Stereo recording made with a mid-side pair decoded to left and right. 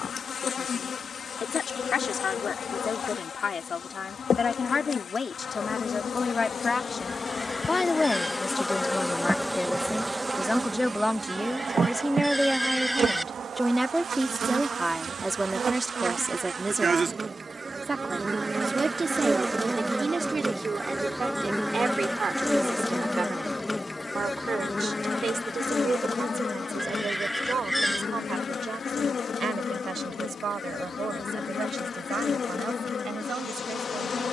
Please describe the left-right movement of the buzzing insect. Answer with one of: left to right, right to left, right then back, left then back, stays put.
right then back.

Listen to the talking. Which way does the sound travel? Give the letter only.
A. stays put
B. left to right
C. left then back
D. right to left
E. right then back
B.